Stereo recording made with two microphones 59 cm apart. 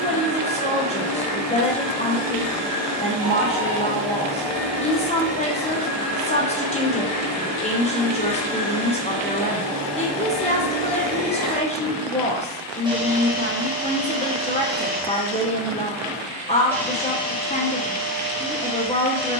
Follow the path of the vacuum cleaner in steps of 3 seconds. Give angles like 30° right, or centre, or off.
20° left, 20° left, 20° left, 20° left, 10° right, centre, 20° left.